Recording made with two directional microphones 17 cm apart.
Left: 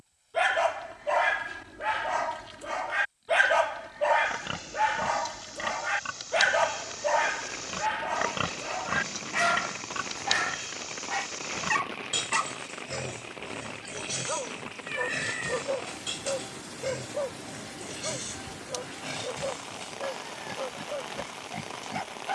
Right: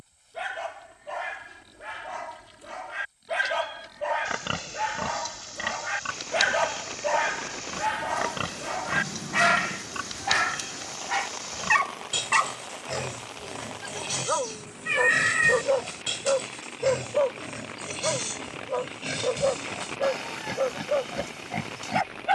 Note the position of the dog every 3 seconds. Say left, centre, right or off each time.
left, left, centre, right, right, right, right, right.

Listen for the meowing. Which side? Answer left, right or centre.
right.